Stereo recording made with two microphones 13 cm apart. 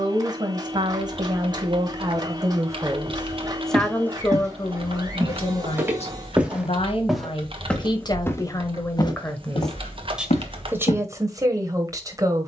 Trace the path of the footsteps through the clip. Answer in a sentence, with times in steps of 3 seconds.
In this clip you hear the footsteps not at all from 0 s, on the right from 3 s, in the centre from 6 s and on the left from 9 s.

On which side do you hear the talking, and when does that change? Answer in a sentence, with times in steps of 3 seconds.
You can hear the talking on the right from 0 s, on the left from 3 s and in the centre from 9 s.